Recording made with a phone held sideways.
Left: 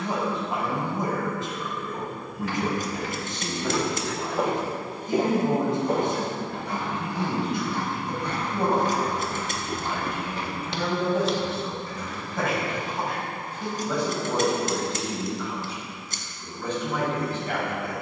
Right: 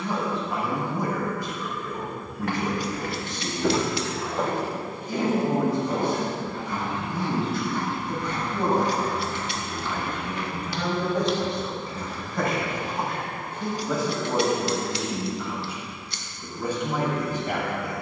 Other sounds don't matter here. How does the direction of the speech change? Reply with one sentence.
You can hear the speech go from the left side to the right.